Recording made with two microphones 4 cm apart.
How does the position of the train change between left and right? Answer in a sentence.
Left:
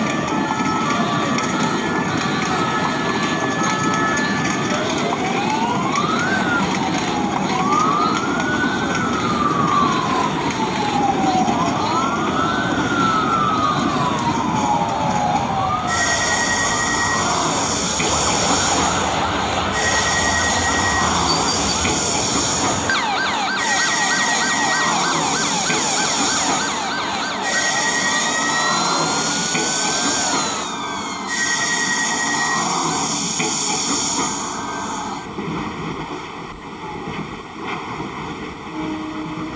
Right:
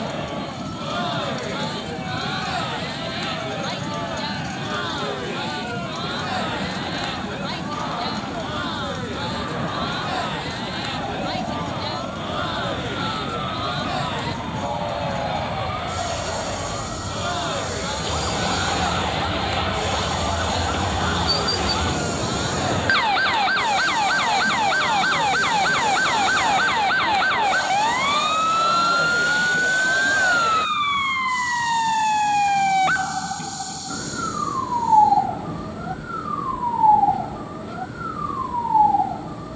In this clip you hear the train stay put.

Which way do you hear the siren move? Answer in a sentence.
In this clip you hear the siren go from the left side to the right.